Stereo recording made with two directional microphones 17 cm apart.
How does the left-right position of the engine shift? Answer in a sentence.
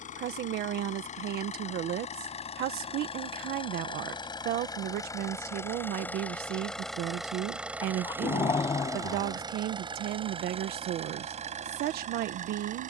In this clip you hear the engine move to the right.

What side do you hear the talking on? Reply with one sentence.
In this clip you hear the talking on the right.